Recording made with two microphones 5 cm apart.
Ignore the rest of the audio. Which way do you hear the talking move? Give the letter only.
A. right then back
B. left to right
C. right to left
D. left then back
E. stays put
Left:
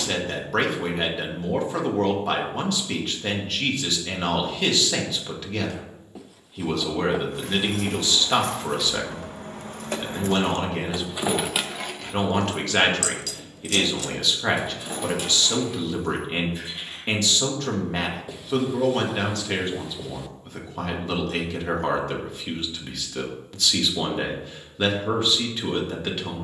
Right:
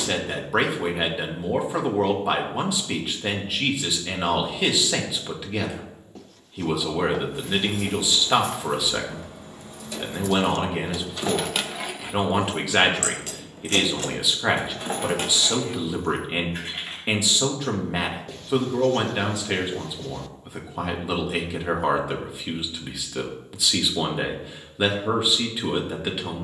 E.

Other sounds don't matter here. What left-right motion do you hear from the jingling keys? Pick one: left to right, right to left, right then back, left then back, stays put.
left to right.